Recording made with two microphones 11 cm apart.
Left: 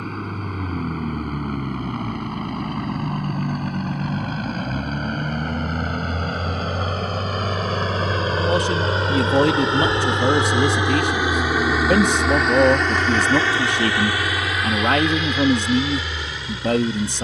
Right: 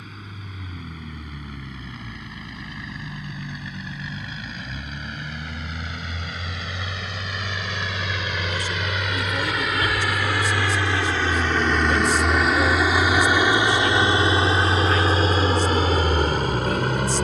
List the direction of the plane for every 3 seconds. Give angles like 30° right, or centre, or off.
60° left, 60° left, 50° left, 20° left, 10° right, 40° right.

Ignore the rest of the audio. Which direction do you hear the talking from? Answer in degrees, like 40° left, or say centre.
70° left.